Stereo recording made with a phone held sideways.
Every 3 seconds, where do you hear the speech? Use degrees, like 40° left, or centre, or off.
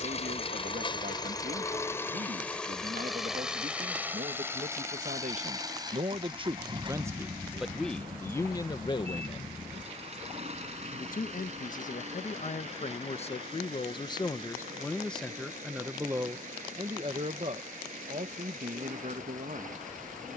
60° right, 60° right, 10° right, 50° left, 30° left, 20° right, 50° right.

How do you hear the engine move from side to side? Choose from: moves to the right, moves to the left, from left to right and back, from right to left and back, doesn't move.
moves to the right.